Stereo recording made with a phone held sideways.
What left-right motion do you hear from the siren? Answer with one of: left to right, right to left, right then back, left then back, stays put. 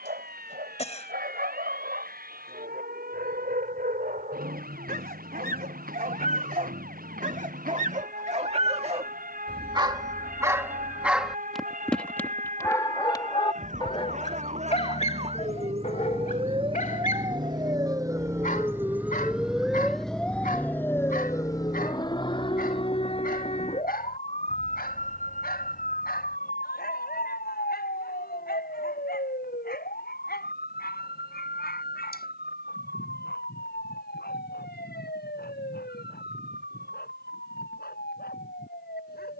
right to left.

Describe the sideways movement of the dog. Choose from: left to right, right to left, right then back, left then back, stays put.
right to left.